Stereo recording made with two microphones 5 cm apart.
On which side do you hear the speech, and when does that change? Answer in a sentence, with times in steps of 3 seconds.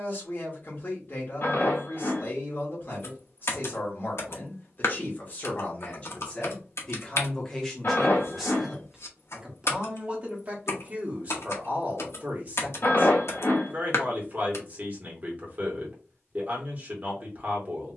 In this clip you hear the speech on the left from 0 s, in the centre from 6 s and on the right from 9 s.